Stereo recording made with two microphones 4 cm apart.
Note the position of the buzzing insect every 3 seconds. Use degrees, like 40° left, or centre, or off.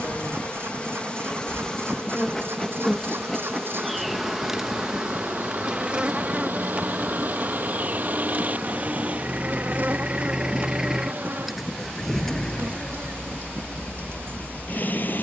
20° left, 10° right, 40° right, 50° right, 60° right.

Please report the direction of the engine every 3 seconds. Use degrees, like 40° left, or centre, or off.
60° right, 60° right, 50° right, 20° right, 30° left.